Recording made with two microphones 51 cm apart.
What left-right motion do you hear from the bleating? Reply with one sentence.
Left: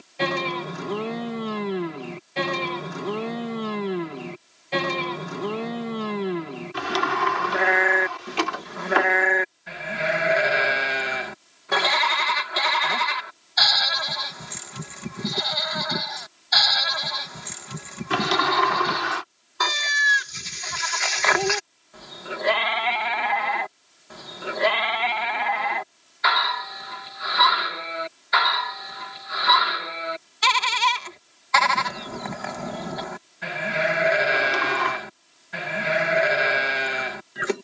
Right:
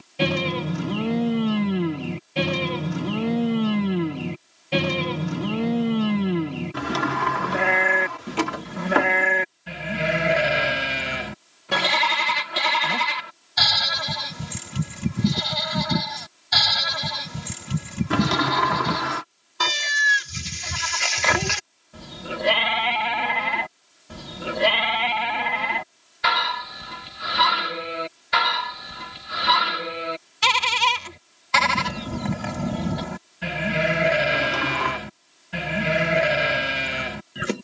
You can hear the bleating stay put.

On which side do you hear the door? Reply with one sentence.
You can hear the door on the right.